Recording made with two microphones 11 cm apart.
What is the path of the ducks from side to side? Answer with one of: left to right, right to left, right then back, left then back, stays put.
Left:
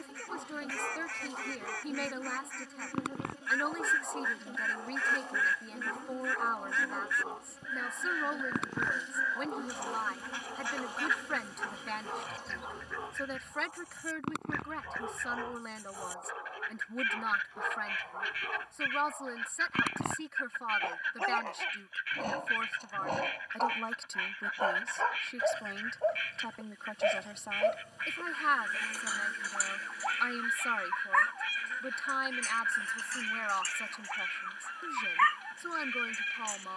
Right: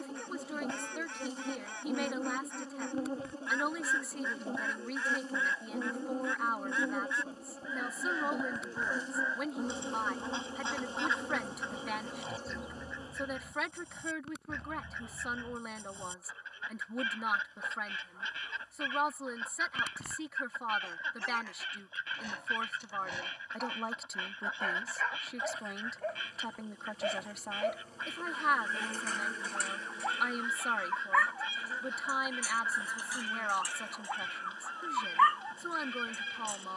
stays put.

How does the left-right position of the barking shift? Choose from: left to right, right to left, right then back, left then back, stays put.
left to right.